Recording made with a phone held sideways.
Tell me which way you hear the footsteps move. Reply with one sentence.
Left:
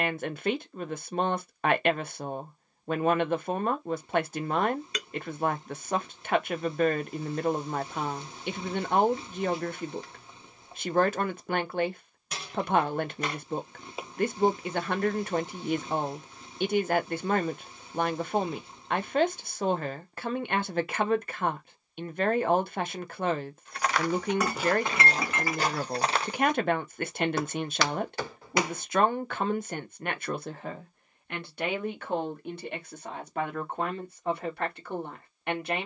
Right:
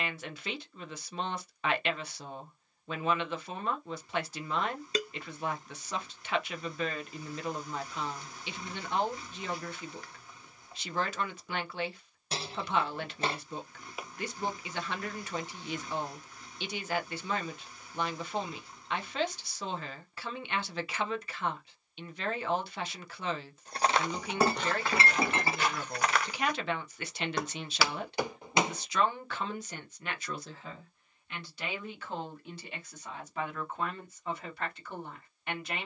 You can hear the footsteps go left and come back.